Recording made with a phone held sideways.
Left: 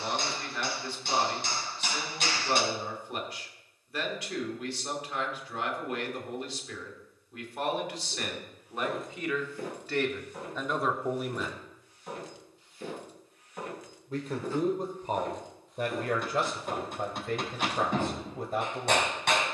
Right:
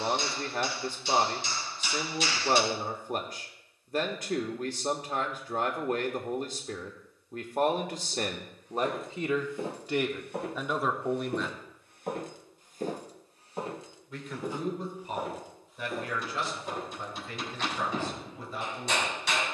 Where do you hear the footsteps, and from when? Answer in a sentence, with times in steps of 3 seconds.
You can hear the footsteps not at all from 0 s, in the centre from 6 s, on the right from 9 s, in the centre from 15 s and not at all from 18 s.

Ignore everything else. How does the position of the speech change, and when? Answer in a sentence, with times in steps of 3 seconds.
You can hear the speech on the right from 0 s, in the centre from 9 s and on the left from 12 s.